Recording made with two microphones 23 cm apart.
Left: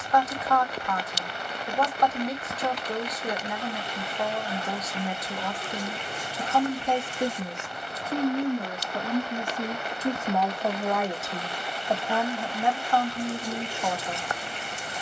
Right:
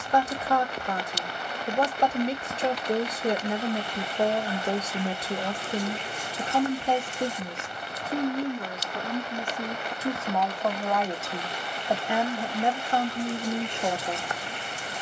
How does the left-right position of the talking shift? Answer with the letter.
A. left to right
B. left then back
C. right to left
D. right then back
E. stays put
B.